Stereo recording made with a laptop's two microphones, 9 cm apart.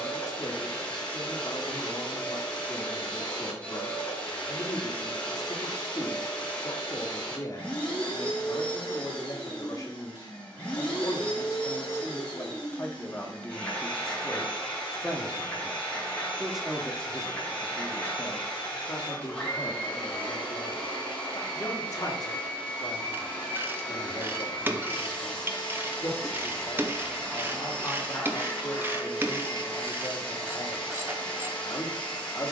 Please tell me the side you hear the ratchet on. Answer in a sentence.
In this clip you hear the ratchet on the right.